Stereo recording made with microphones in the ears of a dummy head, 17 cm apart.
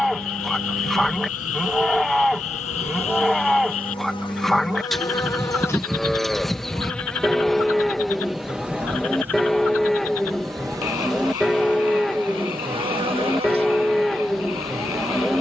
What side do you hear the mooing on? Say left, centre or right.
centre.